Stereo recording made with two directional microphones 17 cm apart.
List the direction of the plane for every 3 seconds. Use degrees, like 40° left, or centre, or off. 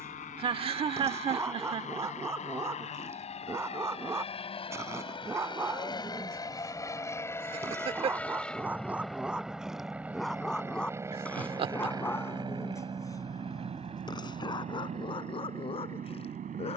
50° left, 40° left, 10° left, 10° right, 30° right, 40° right.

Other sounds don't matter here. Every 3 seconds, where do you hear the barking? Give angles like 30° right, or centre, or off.
20° right, 20° right, 20° right, centre, 20° left, 30° left.